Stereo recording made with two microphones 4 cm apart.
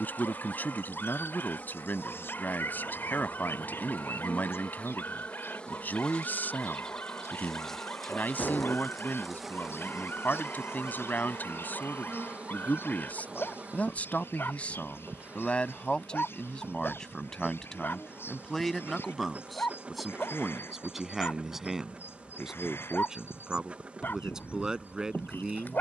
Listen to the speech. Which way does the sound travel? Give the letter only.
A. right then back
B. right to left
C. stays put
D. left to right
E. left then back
D.